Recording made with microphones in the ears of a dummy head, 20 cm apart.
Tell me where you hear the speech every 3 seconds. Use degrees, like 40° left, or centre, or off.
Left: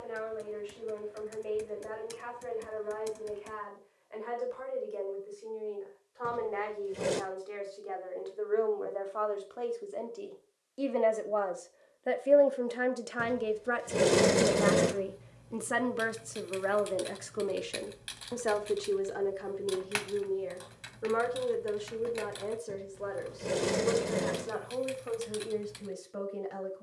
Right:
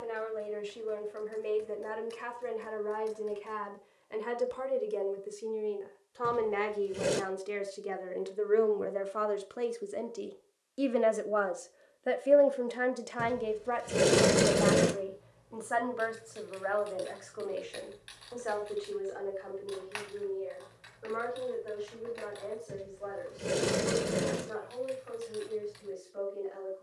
60° right, 50° right, 40° right, 20° right, 10° left, 50° left, 70° left, 80° left, 80° left.